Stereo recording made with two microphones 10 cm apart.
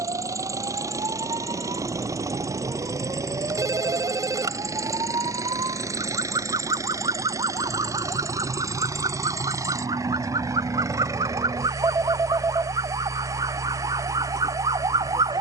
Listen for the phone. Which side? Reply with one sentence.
You can hear the phone on the right.